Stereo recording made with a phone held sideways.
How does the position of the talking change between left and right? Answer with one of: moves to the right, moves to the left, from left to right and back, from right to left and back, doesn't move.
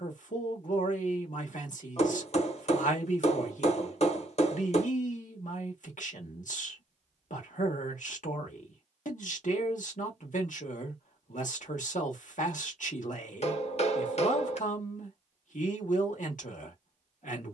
doesn't move.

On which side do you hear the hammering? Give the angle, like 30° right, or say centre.
60° left.